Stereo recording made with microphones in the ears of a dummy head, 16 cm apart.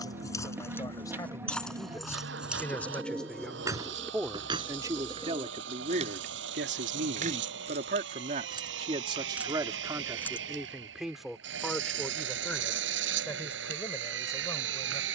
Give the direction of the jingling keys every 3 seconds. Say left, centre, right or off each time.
centre, right, right, centre, off.